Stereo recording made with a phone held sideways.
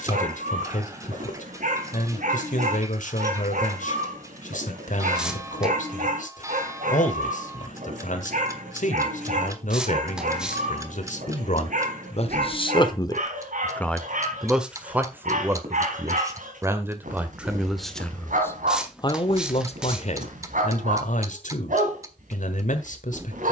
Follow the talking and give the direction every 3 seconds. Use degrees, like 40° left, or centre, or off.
70° left, 70° left, 70° left, 70° left, 20° left, 20° right, 40° left, 70° left.